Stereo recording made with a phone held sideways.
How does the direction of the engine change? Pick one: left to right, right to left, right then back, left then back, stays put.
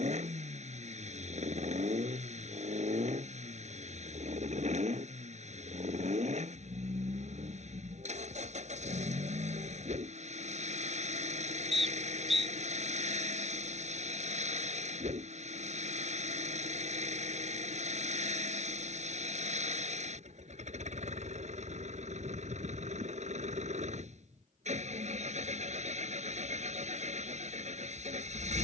stays put.